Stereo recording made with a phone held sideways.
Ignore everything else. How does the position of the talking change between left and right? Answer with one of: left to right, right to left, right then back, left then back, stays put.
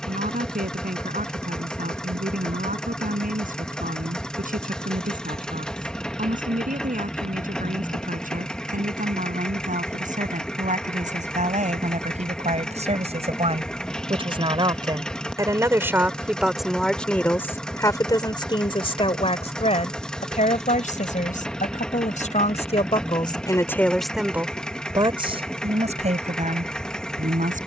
left then back.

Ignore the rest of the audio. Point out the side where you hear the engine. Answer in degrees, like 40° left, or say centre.
10° left.